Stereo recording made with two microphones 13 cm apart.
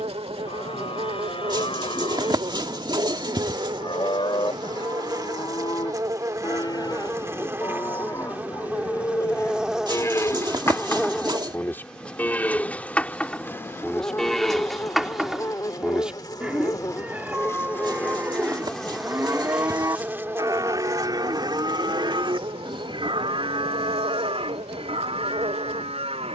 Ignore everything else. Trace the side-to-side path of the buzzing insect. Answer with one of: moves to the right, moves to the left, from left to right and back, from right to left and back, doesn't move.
from right to left and back.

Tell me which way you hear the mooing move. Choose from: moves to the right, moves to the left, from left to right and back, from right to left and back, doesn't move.
moves to the right.